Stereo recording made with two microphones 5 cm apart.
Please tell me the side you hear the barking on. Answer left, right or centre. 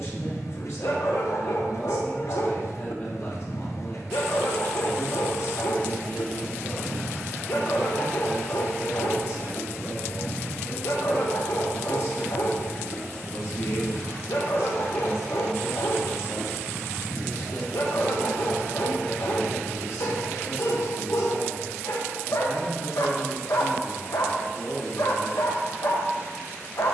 left.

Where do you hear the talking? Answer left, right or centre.
left.